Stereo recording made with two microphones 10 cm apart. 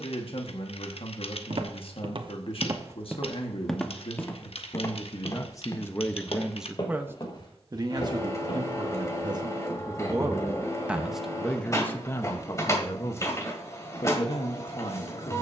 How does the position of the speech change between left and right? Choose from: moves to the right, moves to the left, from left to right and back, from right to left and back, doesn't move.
from left to right and back.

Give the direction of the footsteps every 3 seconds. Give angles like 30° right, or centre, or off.
50° right, 20° left, 50° left, off, off.